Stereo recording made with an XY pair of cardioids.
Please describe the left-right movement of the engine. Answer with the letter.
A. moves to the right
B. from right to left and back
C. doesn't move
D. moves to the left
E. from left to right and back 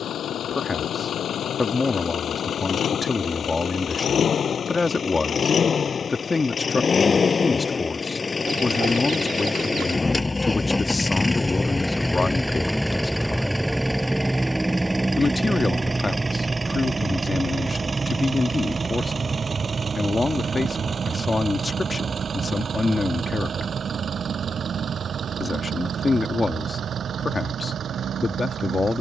A.